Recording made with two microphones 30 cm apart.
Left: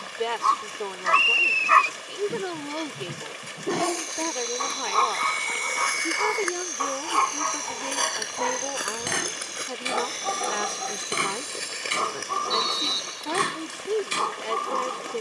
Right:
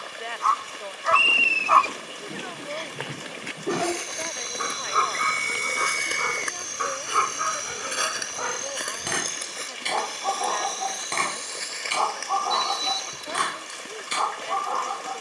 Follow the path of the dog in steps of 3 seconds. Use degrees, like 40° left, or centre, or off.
20° left, 10° right, 10° right, 10° left, 30° left.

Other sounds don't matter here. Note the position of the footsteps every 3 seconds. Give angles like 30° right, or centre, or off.
80° right, 60° right, 20° right, 30° left, 40° left.